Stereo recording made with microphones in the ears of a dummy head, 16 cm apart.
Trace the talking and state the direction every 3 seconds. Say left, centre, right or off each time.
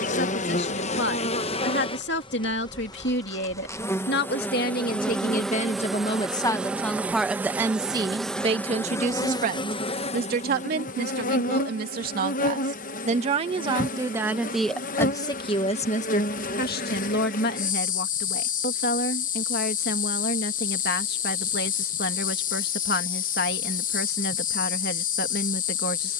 left, left, centre, right, right, left, left, left, left.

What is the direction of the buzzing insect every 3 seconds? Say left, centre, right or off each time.
left, centre, centre, left, left, left, left, left, left.